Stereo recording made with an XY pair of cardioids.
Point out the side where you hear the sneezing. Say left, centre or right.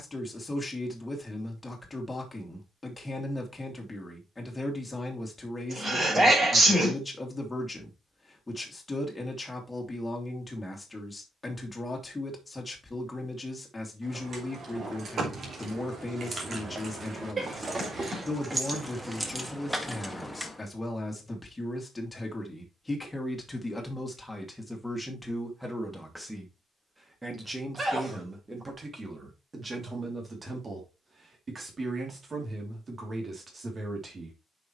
right.